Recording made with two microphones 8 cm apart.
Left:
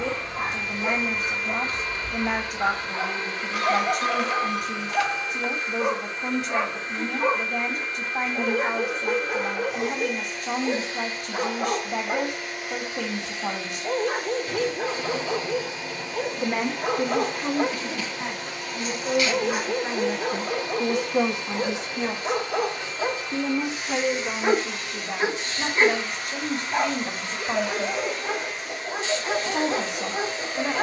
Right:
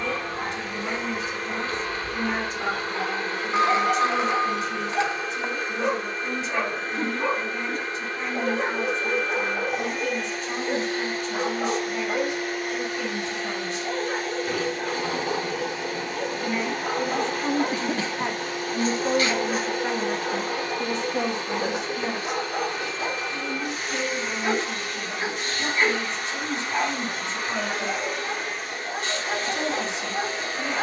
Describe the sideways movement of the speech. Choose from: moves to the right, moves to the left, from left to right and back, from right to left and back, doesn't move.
from left to right and back.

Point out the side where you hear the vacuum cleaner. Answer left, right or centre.
right.